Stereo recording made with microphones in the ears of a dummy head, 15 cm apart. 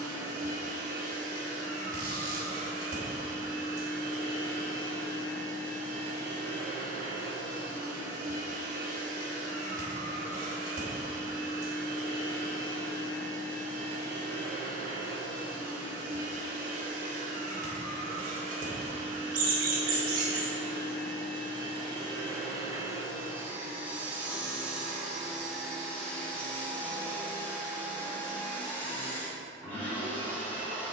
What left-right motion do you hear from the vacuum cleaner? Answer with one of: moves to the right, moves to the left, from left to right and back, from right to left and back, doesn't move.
moves to the left.